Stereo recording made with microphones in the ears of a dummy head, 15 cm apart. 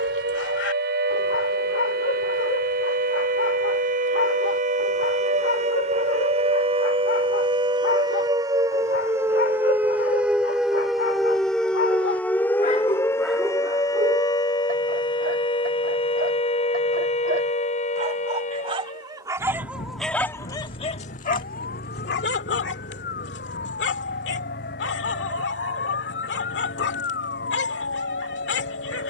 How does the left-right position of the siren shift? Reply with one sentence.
You can hear the siren move to the left.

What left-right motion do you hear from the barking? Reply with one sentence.
In this clip you hear the barking go right and come back.